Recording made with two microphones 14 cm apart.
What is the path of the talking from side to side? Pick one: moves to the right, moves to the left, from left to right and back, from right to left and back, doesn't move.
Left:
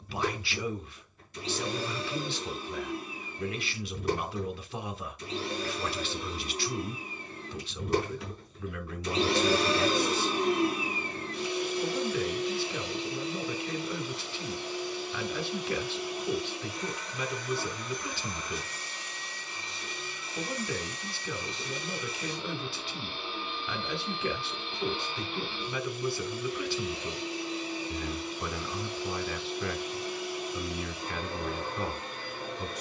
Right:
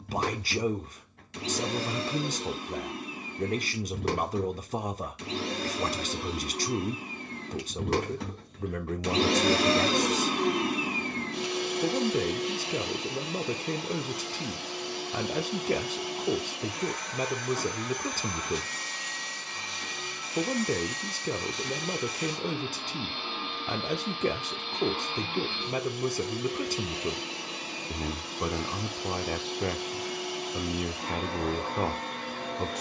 doesn't move.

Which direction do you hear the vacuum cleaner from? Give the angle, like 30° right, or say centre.
80° right.